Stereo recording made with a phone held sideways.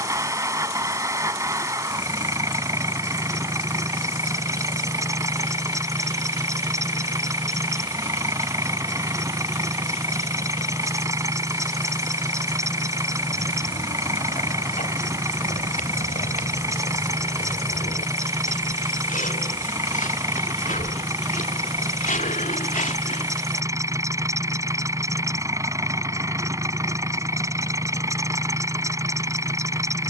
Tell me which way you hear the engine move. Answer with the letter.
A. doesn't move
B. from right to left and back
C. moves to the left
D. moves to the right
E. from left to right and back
A.